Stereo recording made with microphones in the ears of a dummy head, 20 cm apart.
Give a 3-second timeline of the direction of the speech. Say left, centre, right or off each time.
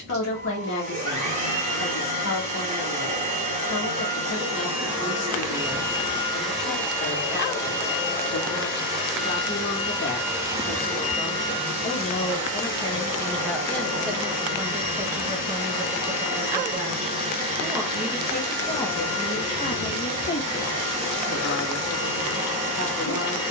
left, left, left, left, centre, right, left, left.